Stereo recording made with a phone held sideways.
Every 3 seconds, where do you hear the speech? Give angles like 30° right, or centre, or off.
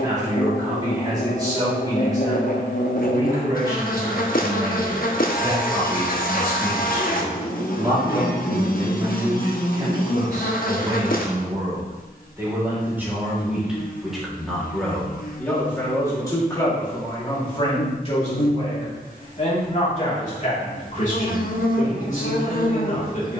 20° right, 20° right, 20° right, 20° right, 10° right, 20° left, 50° left, 50° left.